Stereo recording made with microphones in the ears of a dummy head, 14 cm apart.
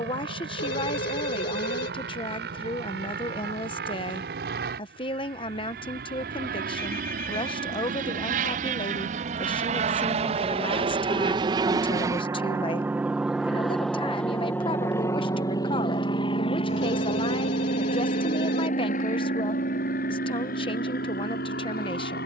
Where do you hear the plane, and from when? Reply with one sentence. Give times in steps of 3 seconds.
You can hear the plane on the right from 0 s, in the centre from 12 s and on the left from 15 s.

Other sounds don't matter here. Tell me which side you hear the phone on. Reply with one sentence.
You can hear the phone on the left.